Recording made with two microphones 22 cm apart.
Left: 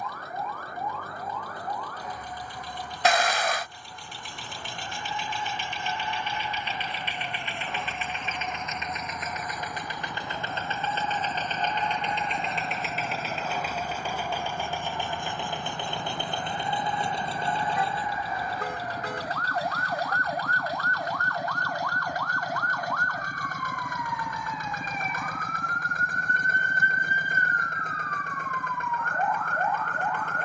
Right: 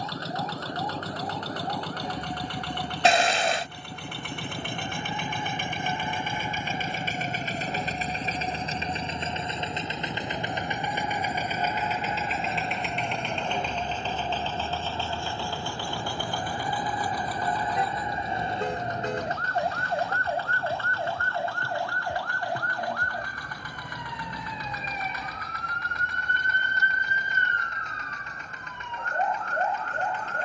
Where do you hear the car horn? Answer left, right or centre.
right.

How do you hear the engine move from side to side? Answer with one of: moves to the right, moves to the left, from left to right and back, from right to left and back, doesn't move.
moves to the left.